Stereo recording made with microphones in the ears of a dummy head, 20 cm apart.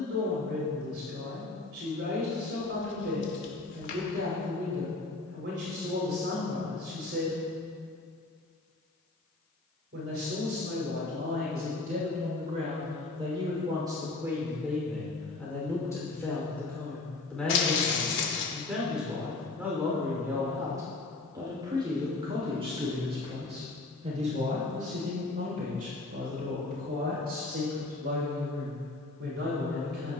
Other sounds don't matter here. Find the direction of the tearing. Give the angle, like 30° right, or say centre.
50° left.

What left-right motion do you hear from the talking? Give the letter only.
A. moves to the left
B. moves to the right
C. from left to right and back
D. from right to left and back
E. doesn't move
D.